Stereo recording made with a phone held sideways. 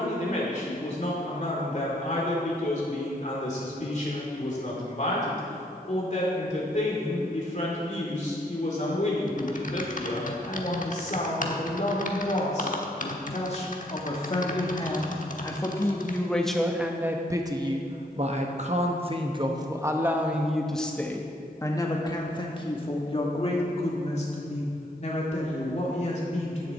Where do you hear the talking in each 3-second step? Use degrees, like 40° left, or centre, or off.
50° left, 50° left, 50° left, 50° left, 40° left, centre, 20° right, 30° left, 50° left.